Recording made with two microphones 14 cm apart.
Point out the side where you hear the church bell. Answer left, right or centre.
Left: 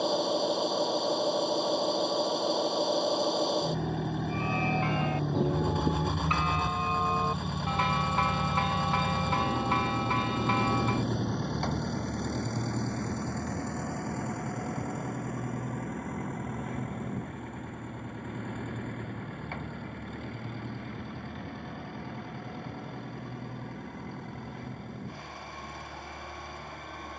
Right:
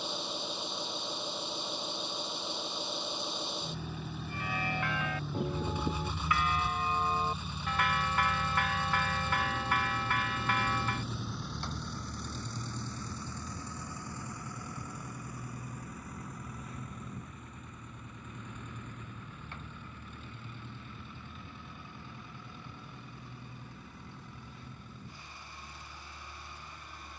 left.